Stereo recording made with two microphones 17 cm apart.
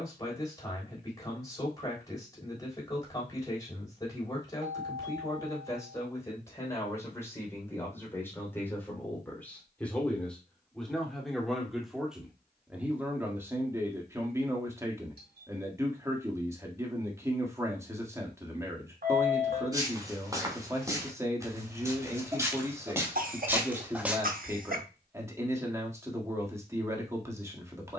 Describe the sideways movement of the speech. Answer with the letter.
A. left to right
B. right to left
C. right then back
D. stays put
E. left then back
A.